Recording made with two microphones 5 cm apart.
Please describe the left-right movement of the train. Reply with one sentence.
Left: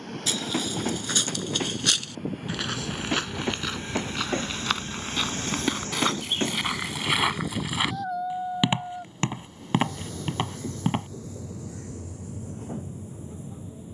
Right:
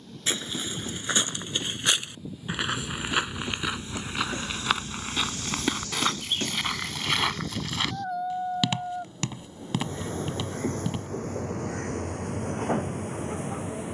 You can hear the train travel towards the right.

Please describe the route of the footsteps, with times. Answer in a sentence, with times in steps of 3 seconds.
In this clip you hear the footsteps on the right from 0 s, in the centre from 3 s, on the left from 9 s and not at all from 12 s.